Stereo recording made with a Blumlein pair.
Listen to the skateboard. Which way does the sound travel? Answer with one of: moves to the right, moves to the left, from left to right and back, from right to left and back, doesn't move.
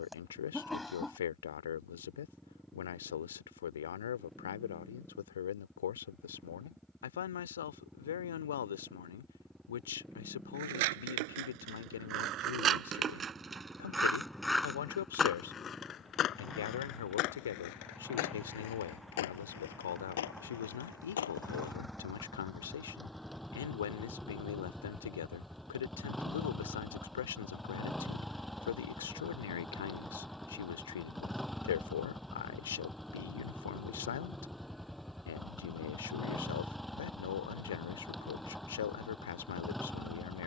moves to the left.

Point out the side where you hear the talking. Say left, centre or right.
left.